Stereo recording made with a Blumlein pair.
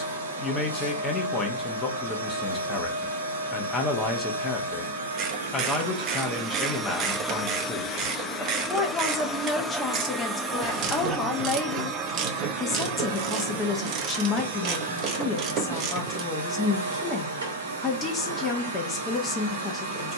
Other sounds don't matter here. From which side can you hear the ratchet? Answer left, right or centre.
right.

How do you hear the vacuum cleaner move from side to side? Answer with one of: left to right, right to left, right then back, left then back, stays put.
left then back.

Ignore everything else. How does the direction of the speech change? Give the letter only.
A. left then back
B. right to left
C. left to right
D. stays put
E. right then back
D.